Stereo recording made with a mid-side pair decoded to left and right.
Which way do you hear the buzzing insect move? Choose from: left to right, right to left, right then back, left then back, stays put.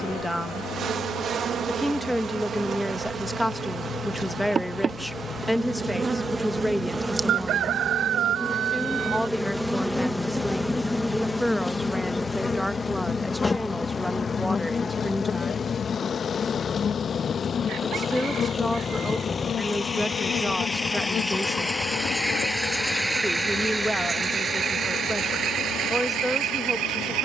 right to left.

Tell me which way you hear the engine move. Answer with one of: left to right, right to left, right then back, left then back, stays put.
left to right.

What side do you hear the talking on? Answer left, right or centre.
centre.